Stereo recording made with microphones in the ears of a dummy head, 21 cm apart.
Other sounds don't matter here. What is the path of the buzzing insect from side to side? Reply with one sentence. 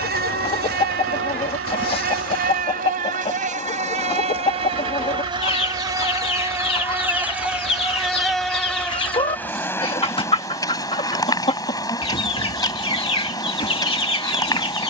You can hear the buzzing insect travel towards the left.